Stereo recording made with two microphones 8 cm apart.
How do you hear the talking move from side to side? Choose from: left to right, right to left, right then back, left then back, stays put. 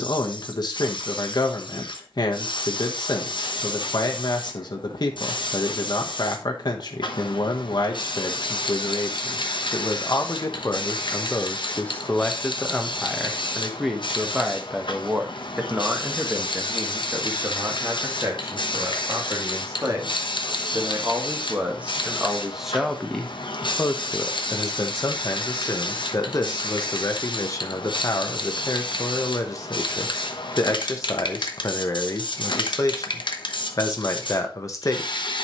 right then back.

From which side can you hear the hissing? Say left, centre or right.
left.